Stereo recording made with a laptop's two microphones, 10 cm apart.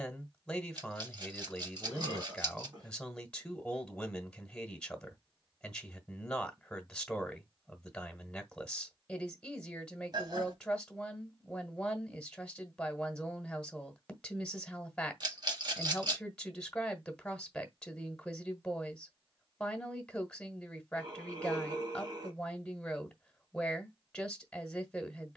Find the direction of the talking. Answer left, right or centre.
centre.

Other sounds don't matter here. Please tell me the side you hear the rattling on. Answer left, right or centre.
right.